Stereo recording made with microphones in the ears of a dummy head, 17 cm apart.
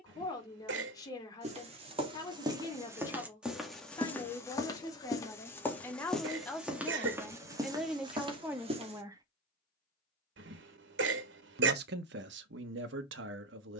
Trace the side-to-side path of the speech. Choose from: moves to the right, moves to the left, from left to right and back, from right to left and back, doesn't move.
moves to the right.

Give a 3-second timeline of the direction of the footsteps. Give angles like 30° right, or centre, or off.
30° right, 10° left, 20° right, off, off.